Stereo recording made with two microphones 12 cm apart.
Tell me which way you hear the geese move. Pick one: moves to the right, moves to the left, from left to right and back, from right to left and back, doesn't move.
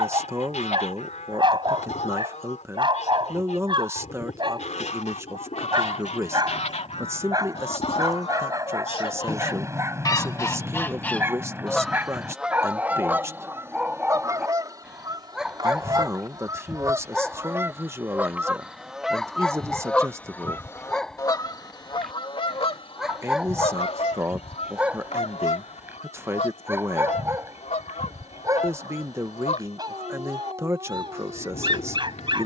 from left to right and back.